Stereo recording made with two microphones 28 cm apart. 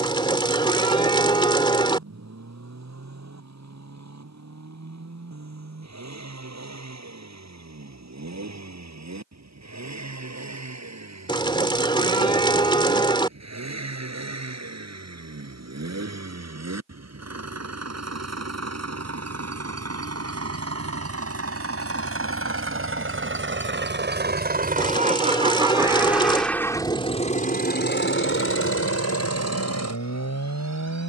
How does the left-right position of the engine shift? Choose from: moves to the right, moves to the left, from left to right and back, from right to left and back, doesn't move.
moves to the left.